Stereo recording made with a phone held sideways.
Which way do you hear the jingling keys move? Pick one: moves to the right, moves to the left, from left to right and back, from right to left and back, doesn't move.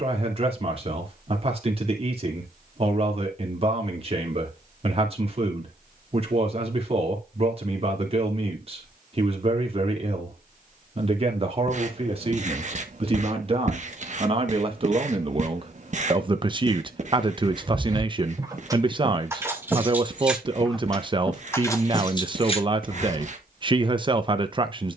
moves to the left.